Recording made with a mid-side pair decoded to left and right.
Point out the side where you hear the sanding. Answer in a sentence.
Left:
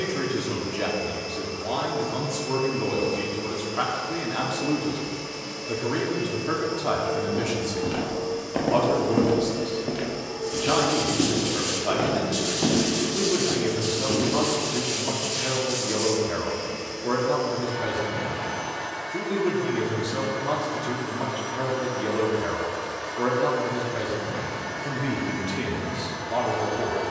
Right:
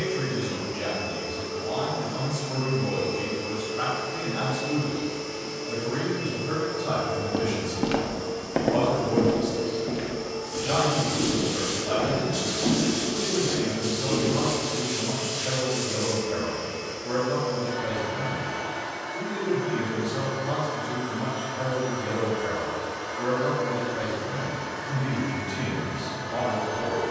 You can hear the sanding on the left.